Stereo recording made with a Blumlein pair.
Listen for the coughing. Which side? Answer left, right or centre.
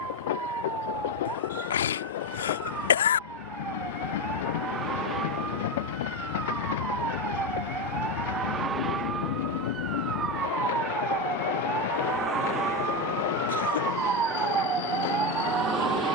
left.